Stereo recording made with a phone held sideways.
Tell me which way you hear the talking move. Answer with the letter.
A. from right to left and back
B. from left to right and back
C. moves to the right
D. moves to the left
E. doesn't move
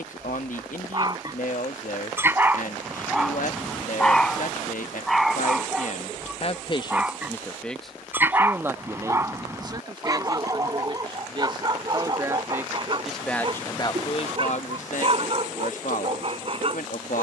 B.